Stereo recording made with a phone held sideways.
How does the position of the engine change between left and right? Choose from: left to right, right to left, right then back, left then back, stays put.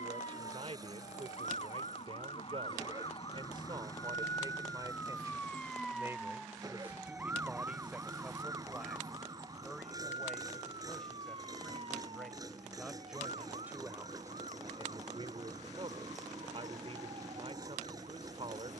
stays put.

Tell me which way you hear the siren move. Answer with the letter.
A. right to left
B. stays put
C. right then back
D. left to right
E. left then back
D.